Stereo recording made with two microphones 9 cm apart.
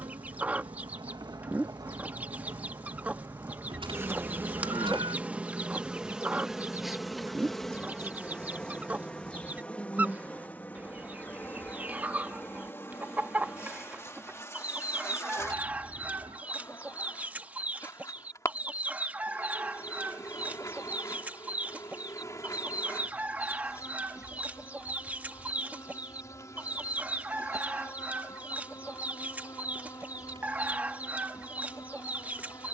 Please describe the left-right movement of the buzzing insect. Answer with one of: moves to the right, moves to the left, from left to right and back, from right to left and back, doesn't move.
moves to the left.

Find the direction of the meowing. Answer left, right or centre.
right.